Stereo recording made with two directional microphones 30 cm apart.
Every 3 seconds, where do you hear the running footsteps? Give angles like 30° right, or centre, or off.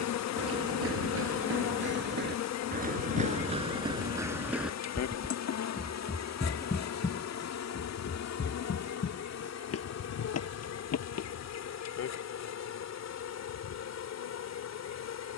40° right, 10° right, 30° left, 50° left, off.